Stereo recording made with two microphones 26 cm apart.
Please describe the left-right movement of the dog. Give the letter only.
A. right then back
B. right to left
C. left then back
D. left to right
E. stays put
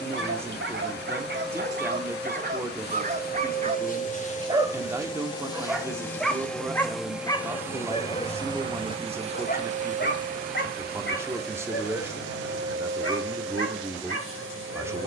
B.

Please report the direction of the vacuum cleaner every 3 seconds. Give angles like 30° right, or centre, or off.
40° left, 30° left, 10° right, 30° right, 50° right.